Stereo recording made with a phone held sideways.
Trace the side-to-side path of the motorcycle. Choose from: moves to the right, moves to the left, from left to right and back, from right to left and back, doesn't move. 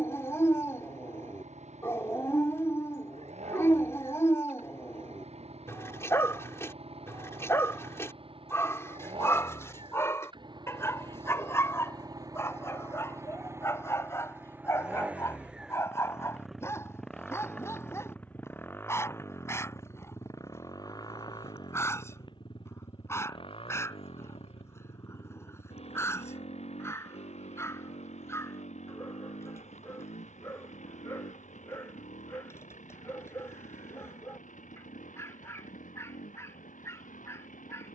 moves to the left.